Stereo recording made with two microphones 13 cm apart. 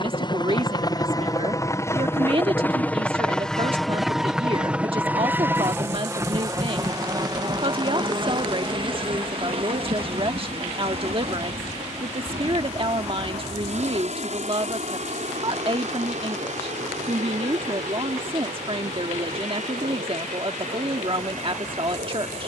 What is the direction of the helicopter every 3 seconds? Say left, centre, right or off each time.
left, centre, right, right, right, right, right, right.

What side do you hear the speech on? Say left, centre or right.
right.